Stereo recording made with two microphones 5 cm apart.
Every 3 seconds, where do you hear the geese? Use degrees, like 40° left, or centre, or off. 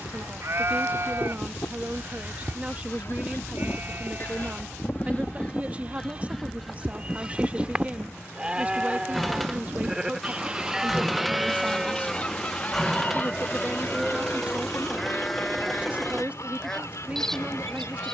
60° left, 40° left, 10° right, 10° right, 40° left, 70° left.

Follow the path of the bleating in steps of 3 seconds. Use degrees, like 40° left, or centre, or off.
50° right, 30° right, 20° right, 10° right, centre, 10° left.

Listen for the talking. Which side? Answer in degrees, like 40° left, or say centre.
30° right.